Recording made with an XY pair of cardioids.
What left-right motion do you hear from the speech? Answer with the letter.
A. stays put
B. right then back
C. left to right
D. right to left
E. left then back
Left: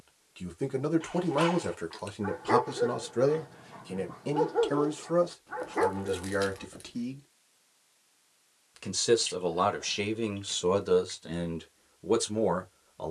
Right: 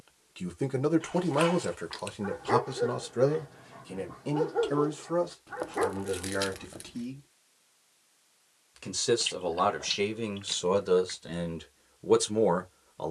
E.